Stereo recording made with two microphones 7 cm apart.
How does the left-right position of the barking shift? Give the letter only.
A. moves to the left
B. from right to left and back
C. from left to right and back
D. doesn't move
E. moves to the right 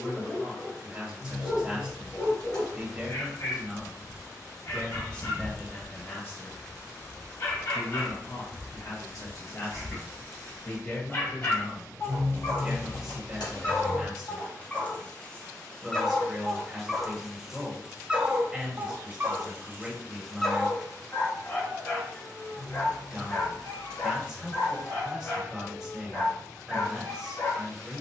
C.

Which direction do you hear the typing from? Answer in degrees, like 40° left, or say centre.
80° left.